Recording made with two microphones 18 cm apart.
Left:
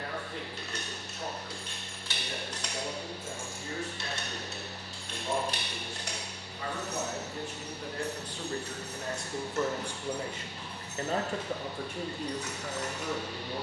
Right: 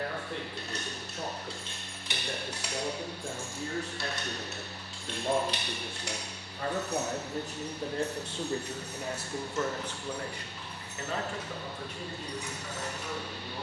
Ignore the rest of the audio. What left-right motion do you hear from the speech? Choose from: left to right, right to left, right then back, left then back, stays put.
right to left.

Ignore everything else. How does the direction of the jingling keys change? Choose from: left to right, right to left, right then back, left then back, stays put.
left then back.